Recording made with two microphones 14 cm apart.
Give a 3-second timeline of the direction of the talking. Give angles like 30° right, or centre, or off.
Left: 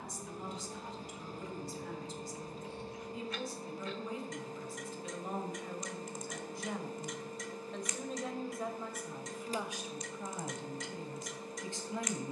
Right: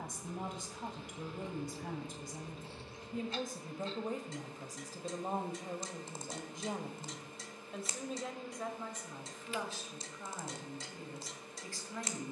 60° right, 40° right, 10° right, 20° left.